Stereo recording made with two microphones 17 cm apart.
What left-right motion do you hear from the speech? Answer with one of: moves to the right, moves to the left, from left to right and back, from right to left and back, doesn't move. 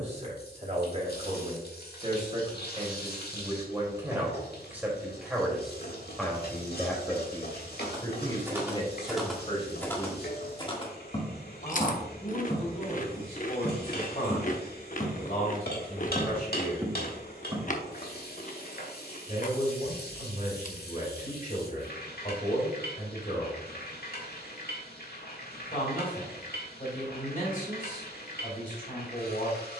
moves to the left.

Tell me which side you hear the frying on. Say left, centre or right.
left.